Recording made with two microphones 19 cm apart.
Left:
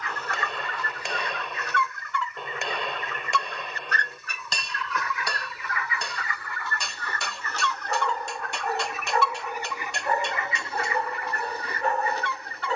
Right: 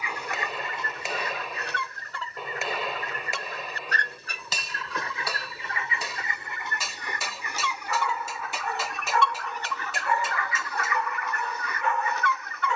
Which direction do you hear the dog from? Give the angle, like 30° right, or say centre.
40° left.